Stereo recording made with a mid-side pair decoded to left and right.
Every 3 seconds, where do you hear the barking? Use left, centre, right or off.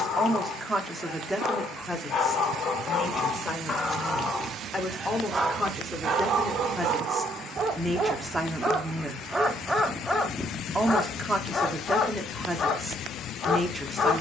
left, centre, right, centre, left.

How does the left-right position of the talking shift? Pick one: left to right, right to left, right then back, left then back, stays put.
left then back.